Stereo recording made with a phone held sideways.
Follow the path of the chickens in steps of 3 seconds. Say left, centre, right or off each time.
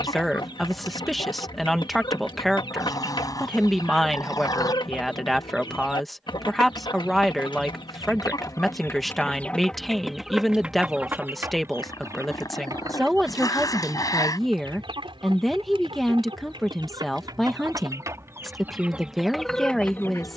left, left, left, centre, right, right, centre.